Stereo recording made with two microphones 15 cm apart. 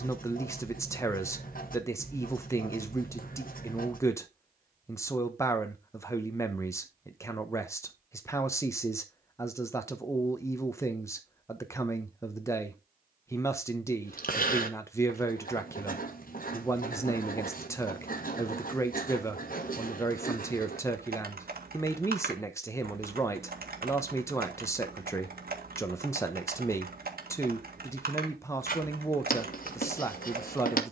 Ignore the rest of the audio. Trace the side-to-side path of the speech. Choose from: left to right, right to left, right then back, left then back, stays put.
stays put.